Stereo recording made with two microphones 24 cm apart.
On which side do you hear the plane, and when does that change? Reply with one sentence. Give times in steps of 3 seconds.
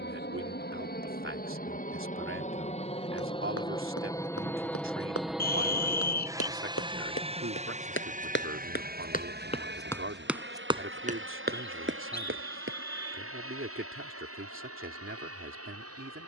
You can hear the plane on the left from 0 s, in the centre from 3 s and on the right from 6 s.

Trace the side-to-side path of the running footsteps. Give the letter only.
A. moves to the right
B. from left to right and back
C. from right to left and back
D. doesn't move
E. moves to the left
A.